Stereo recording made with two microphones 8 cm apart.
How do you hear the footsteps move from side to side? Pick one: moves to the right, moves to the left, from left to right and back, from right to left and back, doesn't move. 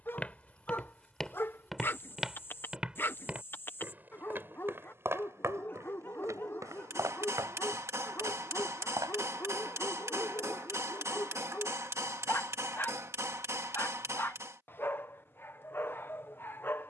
moves to the right.